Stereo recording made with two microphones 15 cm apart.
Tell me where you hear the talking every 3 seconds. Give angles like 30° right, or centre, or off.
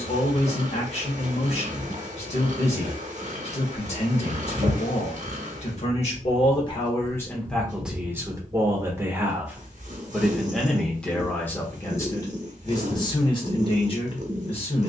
40° left, 40° left, 10° left, centre, 30° left.